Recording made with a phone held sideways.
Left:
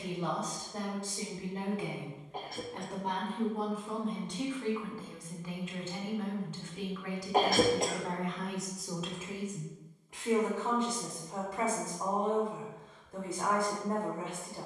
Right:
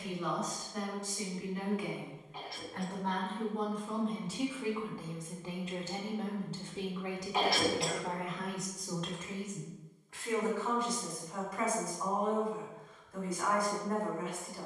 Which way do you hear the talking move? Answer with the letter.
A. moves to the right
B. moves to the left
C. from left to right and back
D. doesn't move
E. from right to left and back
C.